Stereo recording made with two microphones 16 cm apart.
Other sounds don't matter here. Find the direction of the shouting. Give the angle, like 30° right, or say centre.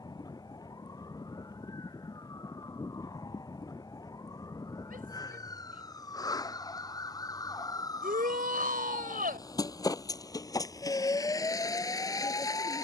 60° right.